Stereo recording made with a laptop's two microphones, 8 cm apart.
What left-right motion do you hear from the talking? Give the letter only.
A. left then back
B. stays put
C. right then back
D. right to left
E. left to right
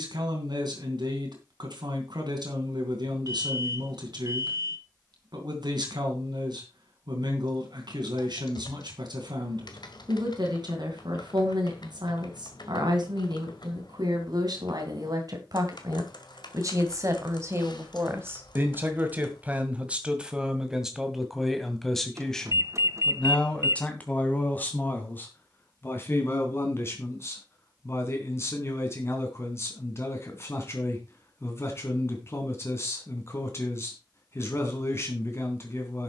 D.